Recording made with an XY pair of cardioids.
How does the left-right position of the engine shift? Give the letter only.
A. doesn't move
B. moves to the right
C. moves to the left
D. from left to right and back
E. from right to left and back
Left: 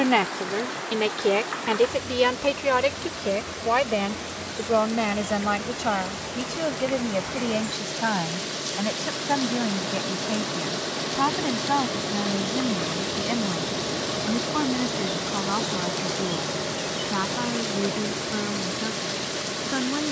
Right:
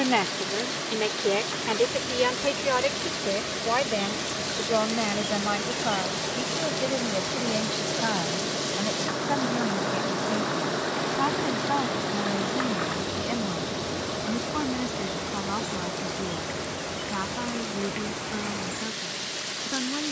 C.